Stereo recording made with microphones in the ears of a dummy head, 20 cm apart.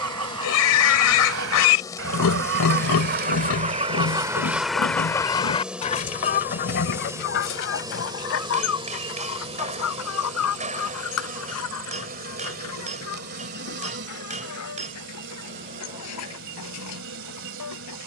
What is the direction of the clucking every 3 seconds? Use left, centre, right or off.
right, centre, left, left, left, left.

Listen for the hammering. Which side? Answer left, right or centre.
right.